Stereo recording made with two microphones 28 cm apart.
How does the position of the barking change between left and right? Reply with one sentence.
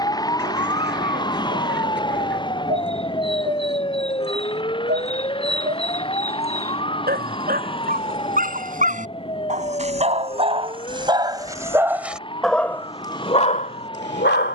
You can hear the barking travel towards the left.